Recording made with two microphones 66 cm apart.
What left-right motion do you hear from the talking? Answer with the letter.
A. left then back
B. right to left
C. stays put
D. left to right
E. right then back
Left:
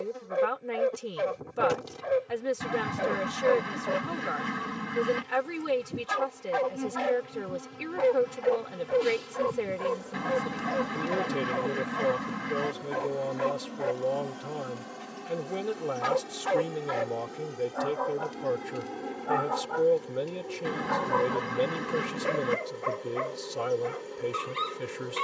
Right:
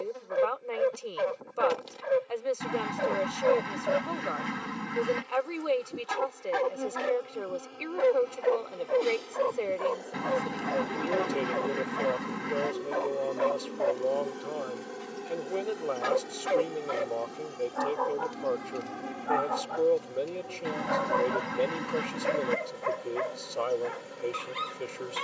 C.